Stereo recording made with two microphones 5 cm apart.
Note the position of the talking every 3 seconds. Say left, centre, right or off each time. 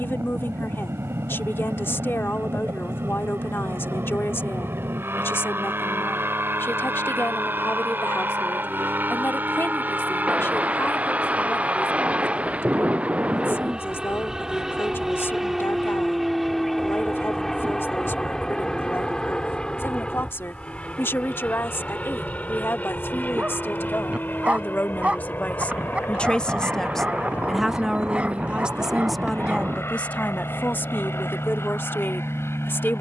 left, left, left, left, left, left, left, left, left, centre, left.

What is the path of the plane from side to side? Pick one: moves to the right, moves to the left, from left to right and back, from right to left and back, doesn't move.
moves to the left.